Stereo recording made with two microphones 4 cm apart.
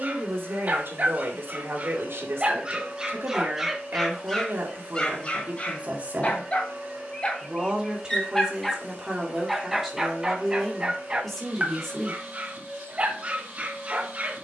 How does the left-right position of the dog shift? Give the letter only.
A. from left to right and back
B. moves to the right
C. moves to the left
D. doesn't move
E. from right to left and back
E.